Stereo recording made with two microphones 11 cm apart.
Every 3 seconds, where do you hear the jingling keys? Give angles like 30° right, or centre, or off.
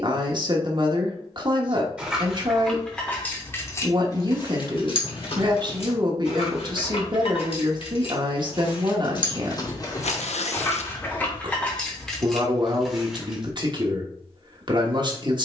centre, 40° left, 60° left, 30° left, centre.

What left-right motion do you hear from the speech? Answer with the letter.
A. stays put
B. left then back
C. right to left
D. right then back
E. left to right
A.